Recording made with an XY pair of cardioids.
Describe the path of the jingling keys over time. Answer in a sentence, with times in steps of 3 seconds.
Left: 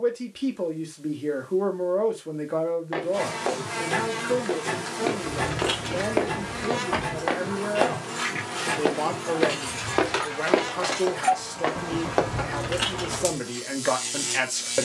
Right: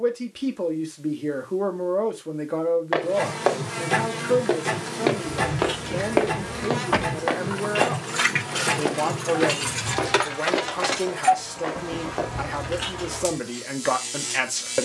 In this clip you hear the jingling keys not at all from 0 s, on the left from 3 s, on the right from 6 s and on the left from 12 s.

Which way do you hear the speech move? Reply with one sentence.
In this clip you hear the speech stay put.